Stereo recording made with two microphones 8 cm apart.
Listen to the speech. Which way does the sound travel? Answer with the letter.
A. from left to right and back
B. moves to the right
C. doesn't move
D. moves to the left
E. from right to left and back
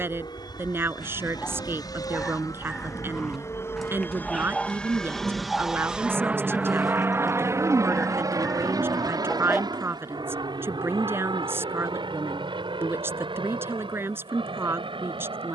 C.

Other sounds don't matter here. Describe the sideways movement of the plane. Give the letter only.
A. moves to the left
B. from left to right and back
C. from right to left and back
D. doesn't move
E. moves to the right
E.